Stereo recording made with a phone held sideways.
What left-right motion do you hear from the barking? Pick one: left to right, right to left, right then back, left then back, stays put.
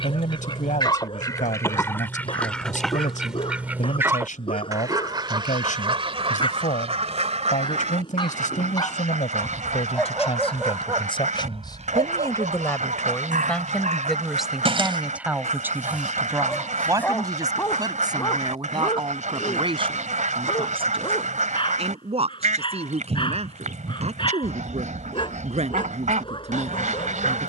right then back.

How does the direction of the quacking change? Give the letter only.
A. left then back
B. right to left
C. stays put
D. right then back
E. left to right
E.